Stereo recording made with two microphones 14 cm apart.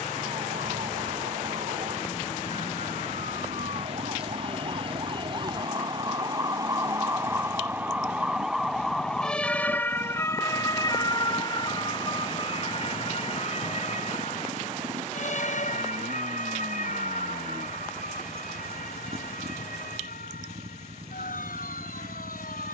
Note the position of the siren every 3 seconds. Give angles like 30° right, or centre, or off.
50° right, 40° right, 20° right, 20° left, 50° left, 60° left, 70° left, 80° left.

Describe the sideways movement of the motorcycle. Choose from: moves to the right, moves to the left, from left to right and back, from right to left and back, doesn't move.
doesn't move.